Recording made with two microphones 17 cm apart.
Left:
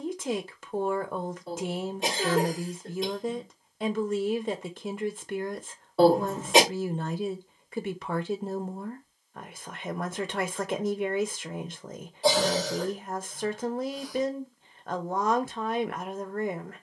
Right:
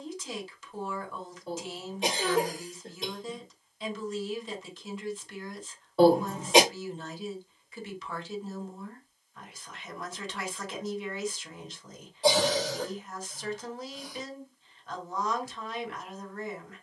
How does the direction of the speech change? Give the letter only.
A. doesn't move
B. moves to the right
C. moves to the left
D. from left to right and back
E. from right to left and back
A.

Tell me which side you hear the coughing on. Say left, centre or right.
centre.